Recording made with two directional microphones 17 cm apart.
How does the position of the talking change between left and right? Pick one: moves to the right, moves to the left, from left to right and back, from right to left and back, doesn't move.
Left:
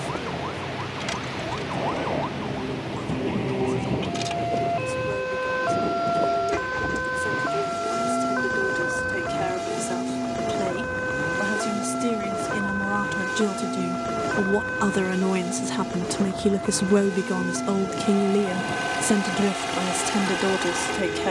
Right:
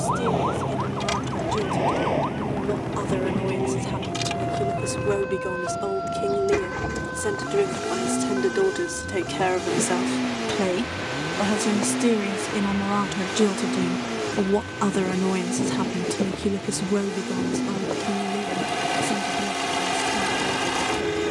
moves to the left.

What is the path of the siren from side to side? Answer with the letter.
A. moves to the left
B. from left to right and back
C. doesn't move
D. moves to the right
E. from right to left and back
A.